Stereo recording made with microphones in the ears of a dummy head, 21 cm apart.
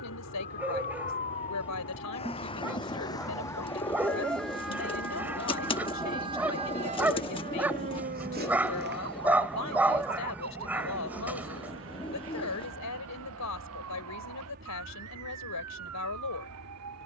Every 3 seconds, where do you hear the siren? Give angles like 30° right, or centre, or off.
30° left, centre, 30° right, 60° right, 70° right, 70° right.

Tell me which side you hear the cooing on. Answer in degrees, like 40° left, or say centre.
20° left.